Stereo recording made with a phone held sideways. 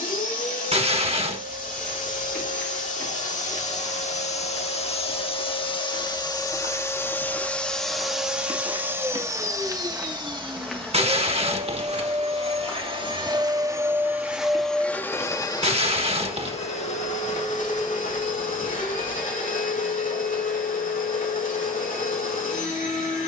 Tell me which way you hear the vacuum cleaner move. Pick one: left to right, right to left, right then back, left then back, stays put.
right then back.